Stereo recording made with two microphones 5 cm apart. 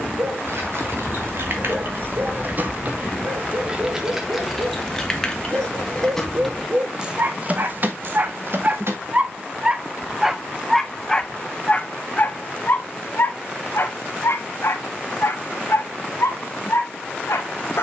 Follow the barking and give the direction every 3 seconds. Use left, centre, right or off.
right, right, right, centre, left, left.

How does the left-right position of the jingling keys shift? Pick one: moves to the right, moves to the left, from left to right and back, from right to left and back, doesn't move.
from right to left and back.